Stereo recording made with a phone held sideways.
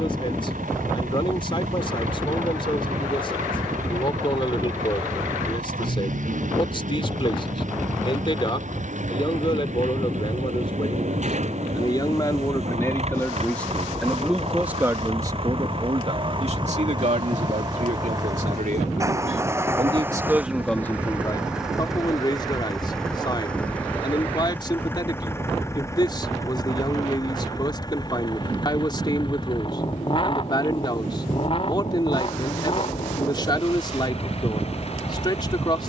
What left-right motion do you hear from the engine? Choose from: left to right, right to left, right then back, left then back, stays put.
right to left.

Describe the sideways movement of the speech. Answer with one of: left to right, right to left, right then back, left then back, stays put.
right then back.